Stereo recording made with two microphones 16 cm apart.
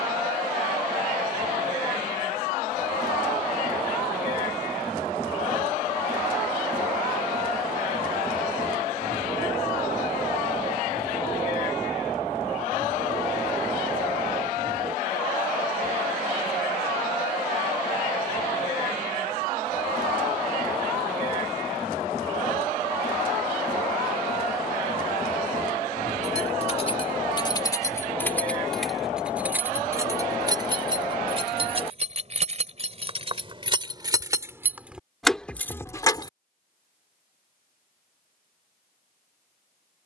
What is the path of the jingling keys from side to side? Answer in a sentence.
You can hear the jingling keys go right and come back.